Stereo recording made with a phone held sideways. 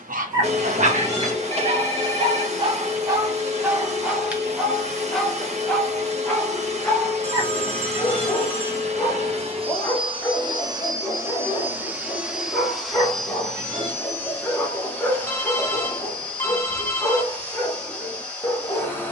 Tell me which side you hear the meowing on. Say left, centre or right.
right.